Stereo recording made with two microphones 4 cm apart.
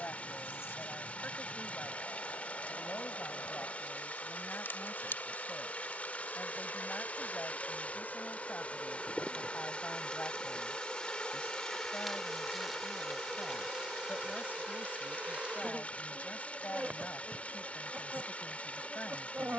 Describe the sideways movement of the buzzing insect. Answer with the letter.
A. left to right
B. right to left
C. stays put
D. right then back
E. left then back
A.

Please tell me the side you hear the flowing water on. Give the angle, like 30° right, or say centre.
30° left.